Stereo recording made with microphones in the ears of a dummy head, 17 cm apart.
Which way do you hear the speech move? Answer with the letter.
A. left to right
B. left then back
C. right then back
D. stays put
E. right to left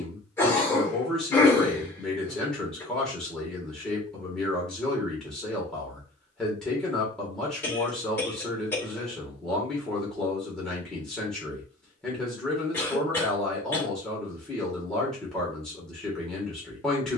D.